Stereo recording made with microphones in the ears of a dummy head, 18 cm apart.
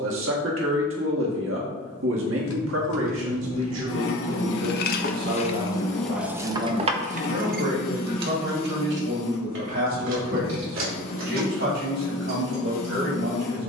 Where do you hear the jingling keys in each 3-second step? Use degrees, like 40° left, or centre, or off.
80° left, 50° left, 40° right, 70° right, 70° right.